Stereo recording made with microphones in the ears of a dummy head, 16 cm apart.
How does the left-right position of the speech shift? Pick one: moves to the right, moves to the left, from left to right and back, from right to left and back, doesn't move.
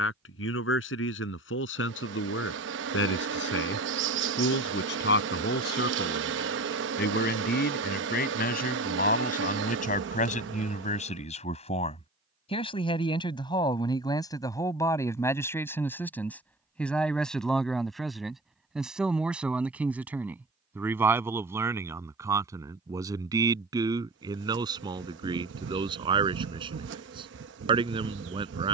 moves to the right.